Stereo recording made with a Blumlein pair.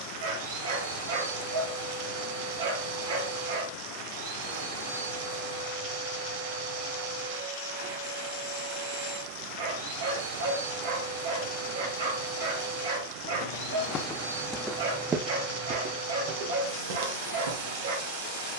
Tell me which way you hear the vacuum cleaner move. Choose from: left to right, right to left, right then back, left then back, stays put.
stays put.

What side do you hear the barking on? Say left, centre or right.
right.